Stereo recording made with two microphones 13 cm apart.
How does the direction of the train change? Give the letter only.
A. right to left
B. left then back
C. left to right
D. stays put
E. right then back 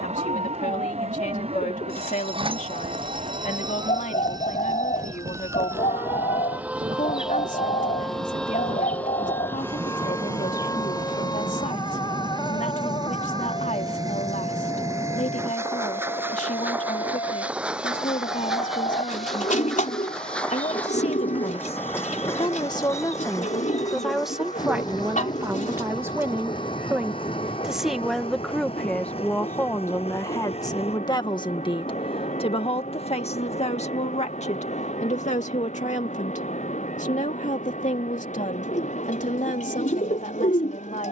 A.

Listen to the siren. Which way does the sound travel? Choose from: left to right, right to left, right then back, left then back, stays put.
right to left.